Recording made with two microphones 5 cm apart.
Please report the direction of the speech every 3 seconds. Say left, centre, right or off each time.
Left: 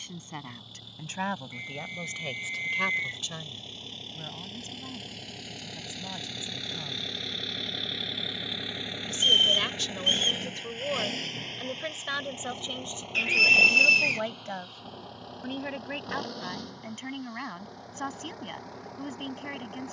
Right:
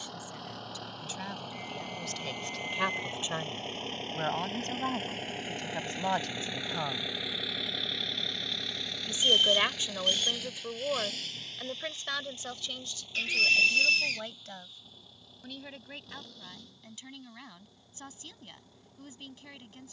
left, right, right, centre, left, left, left.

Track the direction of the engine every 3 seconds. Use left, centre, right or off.
right, right, centre, left, left, left, left.